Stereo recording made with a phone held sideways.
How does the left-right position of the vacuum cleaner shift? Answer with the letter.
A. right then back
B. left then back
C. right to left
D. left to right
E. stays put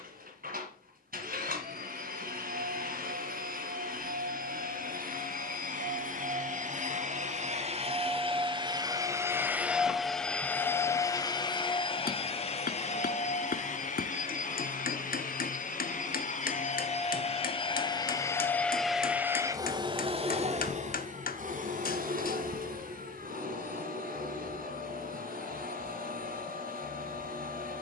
B.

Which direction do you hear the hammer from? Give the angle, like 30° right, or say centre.
70° left.